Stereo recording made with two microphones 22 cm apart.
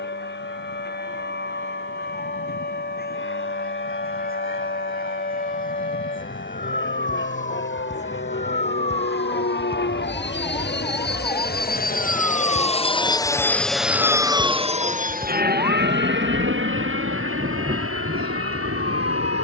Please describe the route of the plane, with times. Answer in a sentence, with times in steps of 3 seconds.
In this clip you hear the plane on the left from 0 s, in the centre from 12 s and on the right from 15 s.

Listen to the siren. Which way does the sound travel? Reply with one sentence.
In this clip you hear the siren move from left to right.